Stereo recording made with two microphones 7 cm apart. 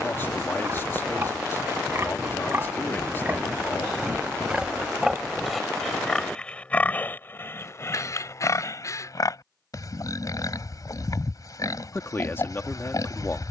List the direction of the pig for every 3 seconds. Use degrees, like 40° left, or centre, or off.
40° right, 10° right, 30° left, 50° left, 50° left.